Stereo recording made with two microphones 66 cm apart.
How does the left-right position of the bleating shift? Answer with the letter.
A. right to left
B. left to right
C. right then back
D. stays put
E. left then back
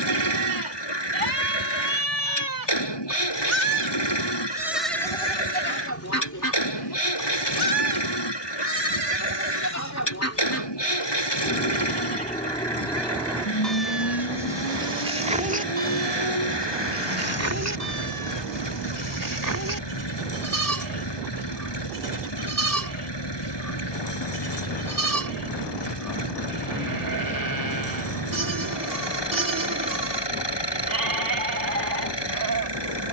E.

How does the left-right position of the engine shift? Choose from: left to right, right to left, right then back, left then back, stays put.
stays put.